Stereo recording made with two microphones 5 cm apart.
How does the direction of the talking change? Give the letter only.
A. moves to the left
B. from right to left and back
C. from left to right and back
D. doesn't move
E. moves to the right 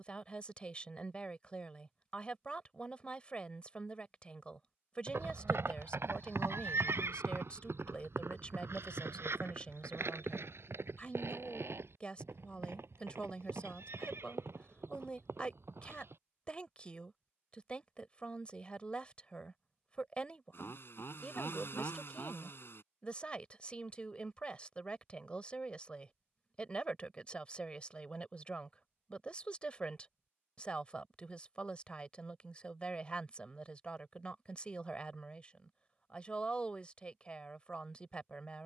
D.